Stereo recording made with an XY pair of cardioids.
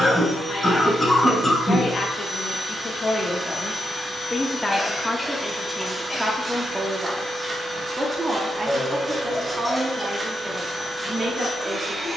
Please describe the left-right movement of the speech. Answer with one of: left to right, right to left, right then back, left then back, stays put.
left to right.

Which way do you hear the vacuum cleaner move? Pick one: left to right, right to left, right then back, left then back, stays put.
stays put.